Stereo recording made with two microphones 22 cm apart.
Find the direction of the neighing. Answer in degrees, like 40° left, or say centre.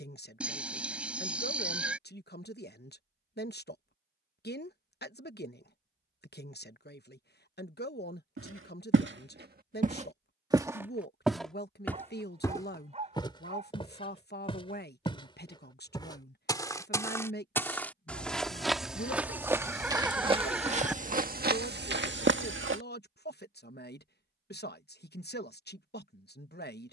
10° right.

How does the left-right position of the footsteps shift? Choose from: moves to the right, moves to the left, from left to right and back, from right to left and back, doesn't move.
from right to left and back.